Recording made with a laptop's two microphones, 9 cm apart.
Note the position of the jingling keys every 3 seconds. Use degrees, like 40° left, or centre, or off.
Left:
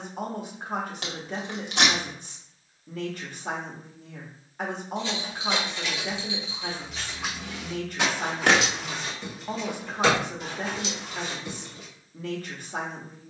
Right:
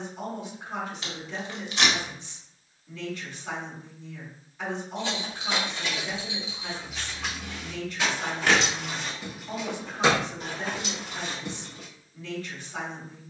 off, 50° right, centre, 30° right, off.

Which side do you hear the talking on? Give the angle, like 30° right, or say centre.
50° left.